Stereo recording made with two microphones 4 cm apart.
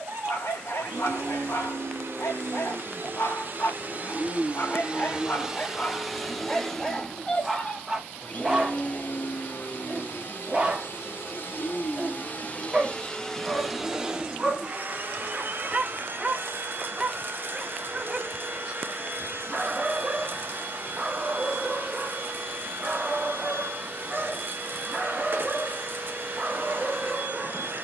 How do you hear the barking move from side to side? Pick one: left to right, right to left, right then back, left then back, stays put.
left to right.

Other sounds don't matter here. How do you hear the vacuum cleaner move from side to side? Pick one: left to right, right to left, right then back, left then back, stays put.
left then back.